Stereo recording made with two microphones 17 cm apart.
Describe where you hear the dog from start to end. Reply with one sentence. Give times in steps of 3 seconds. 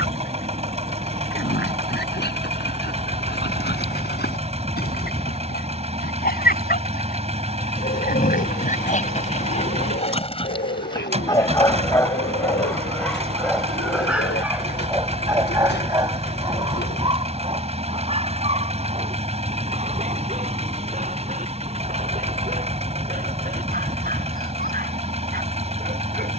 In this clip you hear the dog on the left from 0 s, in the centre from 12 s and on the right from 15 s.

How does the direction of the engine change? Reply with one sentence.
In this clip you hear the engine stay put.